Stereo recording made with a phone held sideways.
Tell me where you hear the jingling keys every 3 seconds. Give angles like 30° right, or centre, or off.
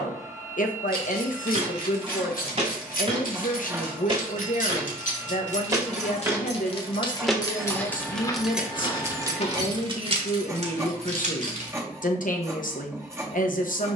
70° left, 60° left, 20° left, 40° right, off.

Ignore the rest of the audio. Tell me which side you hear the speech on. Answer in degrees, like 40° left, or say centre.
60° left.